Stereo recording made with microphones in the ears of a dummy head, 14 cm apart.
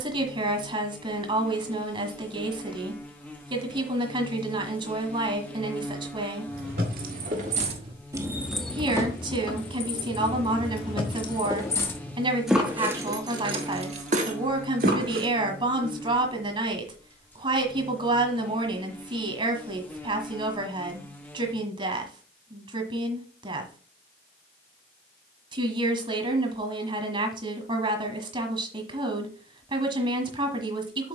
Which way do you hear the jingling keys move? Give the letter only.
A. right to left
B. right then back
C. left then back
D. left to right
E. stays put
C.